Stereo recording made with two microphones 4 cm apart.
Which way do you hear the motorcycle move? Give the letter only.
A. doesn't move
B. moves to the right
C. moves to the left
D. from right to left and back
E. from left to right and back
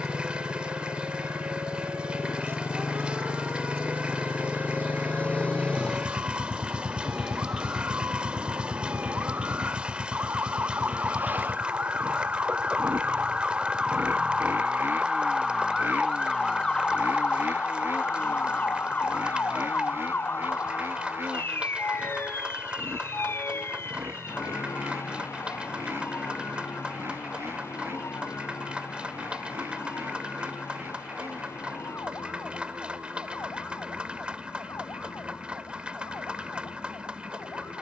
B.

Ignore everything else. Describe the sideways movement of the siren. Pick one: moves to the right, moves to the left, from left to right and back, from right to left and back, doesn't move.
moves to the left.